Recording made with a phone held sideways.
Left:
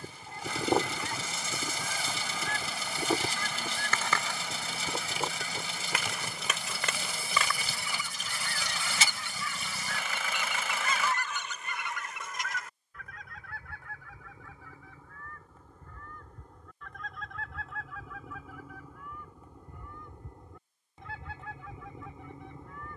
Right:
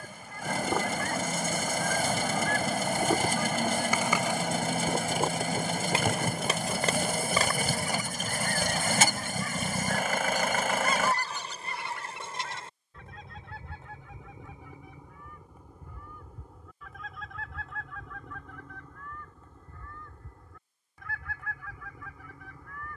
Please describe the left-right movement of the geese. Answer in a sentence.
You can hear the geese move from left to right and back again.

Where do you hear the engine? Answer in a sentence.
In this clip you hear the engine on the right.